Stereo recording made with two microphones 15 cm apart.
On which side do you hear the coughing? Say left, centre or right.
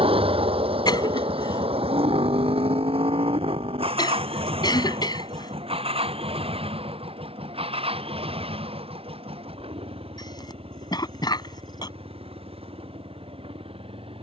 left.